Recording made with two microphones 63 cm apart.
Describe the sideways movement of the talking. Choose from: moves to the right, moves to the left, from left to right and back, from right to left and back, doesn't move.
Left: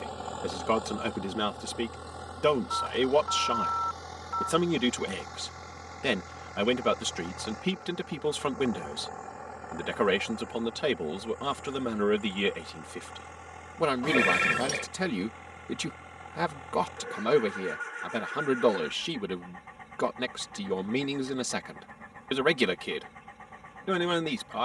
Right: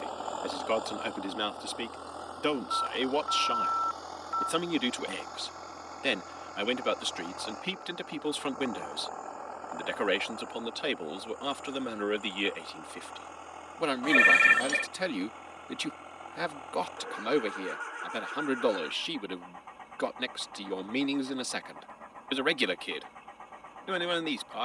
doesn't move.